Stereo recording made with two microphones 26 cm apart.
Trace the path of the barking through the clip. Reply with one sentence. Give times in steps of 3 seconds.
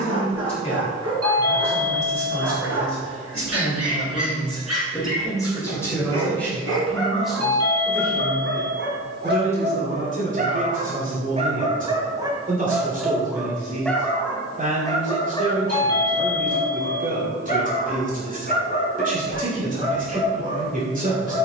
You can hear the barking on the right from 0 s, in the centre from 12 s and on the left from 15 s.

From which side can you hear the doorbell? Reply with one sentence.
You can hear the doorbell on the right.